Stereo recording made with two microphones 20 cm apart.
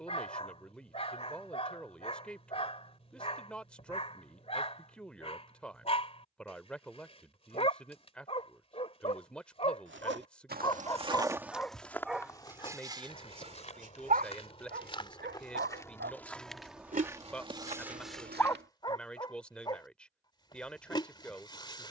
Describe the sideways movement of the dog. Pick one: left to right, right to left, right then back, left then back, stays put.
right then back.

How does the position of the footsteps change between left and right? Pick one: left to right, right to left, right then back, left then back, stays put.
left then back.